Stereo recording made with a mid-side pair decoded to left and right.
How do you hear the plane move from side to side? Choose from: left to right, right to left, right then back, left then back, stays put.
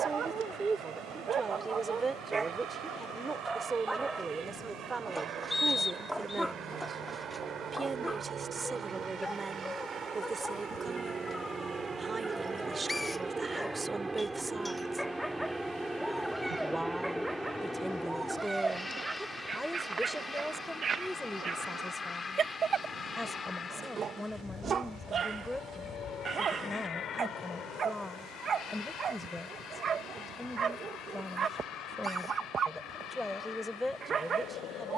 right to left.